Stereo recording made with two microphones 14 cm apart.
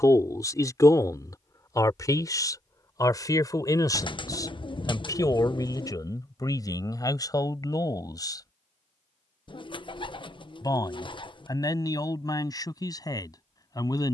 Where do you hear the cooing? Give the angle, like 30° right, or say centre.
40° left.